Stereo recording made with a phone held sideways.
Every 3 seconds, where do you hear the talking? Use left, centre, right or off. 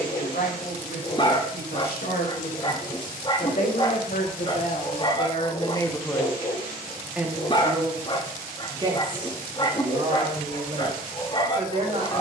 left, left, centre, right.